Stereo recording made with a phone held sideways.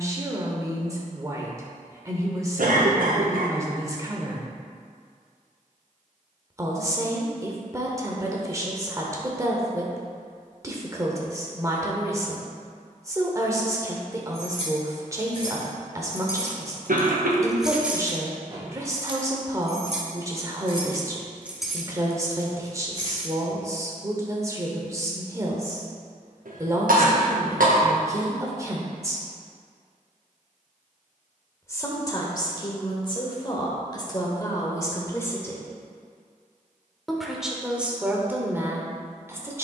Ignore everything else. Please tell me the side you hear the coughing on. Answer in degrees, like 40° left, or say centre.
80° right.